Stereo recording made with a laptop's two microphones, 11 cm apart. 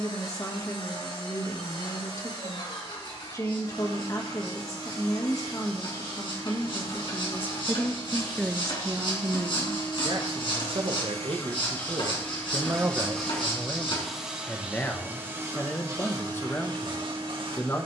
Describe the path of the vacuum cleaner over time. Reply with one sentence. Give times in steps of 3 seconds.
You can hear the vacuum cleaner on the left from 0 s, in the centre from 12 s and on the right from 15 s.